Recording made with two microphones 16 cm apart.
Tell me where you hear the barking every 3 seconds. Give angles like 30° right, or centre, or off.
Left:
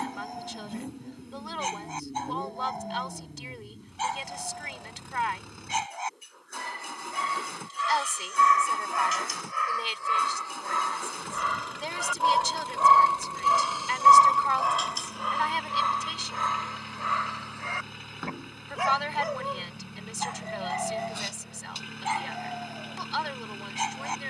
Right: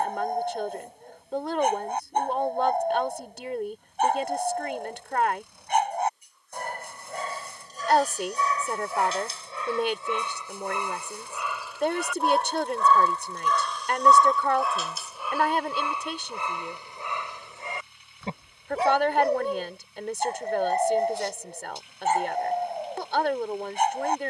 50° right, 50° right, 40° right, 20° right, centre, 10° right, 30° right, 50° right.